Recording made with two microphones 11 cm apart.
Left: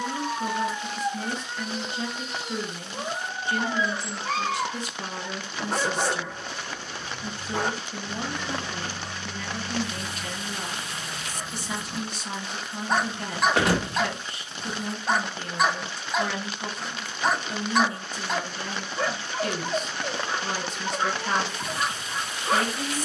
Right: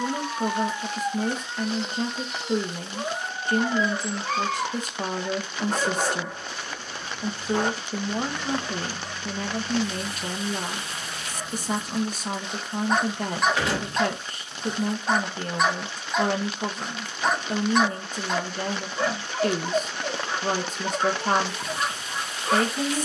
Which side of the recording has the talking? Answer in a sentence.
You can hear the talking on the right.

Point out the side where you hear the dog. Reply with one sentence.
You can hear the dog in the centre.